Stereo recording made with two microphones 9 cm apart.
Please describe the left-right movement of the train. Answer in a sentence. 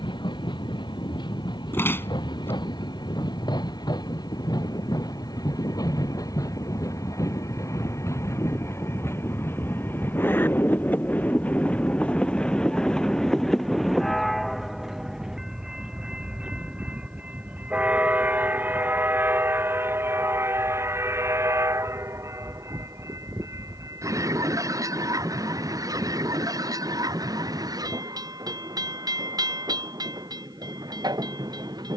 In this clip you hear the train travel towards the right.